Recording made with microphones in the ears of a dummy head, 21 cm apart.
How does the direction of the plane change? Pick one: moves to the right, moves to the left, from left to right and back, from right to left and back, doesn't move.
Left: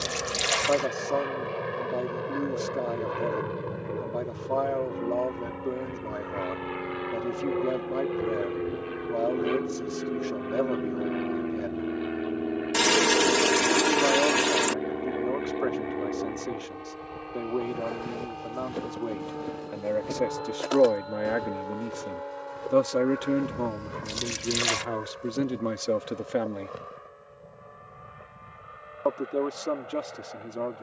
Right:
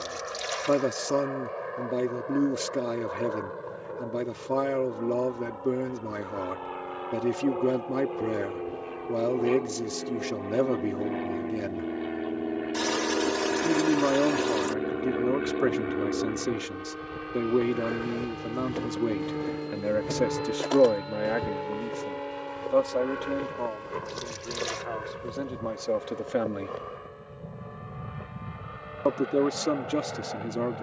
moves to the right.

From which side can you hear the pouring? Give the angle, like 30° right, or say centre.
70° left.